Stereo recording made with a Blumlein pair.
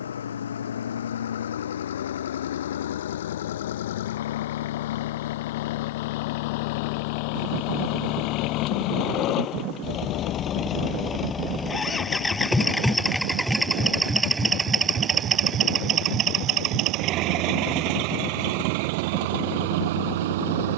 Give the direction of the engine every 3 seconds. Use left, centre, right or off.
left, left, left, left, centre, right, right.